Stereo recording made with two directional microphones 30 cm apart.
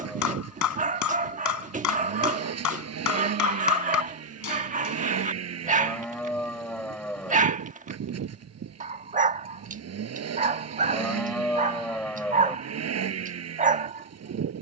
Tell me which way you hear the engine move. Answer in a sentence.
In this clip you hear the engine stay in one place.